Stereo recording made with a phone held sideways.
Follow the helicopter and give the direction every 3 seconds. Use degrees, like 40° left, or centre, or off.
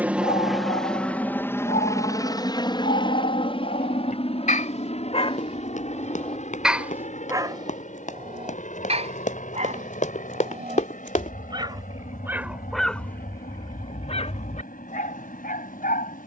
10° left, 40° left, 50° left, 50° left, 60° left, 60° left.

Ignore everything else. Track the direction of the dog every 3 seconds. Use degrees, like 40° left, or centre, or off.
70° left, 60° left, 20° right, 40° right, 20° left, 70° left.